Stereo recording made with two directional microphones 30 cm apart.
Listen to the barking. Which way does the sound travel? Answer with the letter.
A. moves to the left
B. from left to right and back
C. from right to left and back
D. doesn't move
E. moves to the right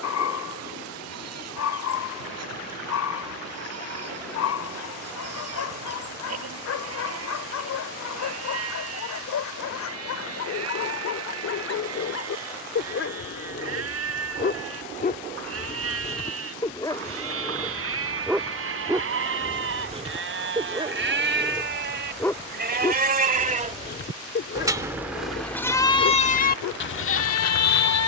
B.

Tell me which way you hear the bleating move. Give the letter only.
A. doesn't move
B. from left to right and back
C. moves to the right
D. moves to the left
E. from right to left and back
D.